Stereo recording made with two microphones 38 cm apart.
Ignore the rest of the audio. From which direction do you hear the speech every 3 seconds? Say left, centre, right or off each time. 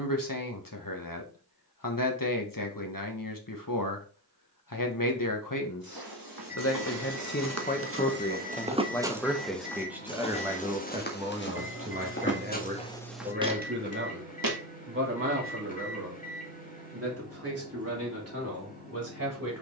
left, left, left, centre, right, right, right.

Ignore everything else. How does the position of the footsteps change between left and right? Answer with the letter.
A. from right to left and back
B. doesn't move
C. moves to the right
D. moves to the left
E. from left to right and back
A.